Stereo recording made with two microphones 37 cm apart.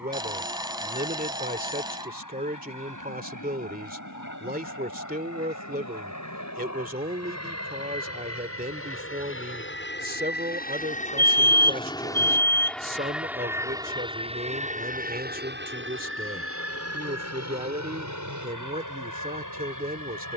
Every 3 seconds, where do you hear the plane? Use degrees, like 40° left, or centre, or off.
70° left, 60° left, 50° left, 20° left, 10° right, 30° right, 50° right.